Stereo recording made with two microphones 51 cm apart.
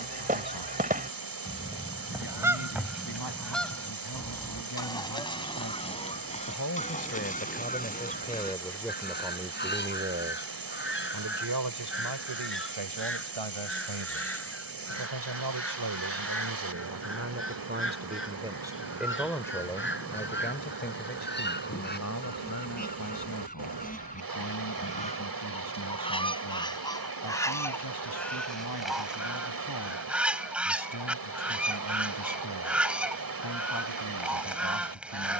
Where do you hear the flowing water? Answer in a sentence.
In this clip you hear the flowing water on the right.